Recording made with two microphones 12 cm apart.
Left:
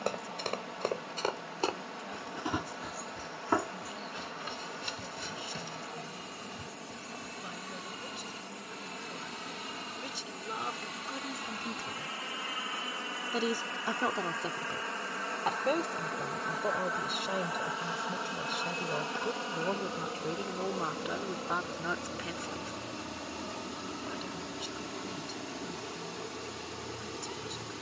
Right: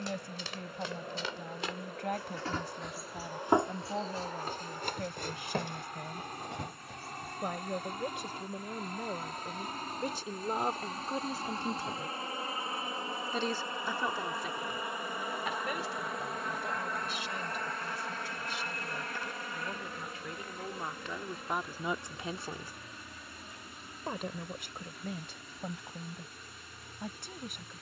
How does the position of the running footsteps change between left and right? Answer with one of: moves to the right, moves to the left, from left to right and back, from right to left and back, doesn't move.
moves to the right.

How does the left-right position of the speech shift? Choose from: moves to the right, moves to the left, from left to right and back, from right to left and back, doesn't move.
from right to left and back.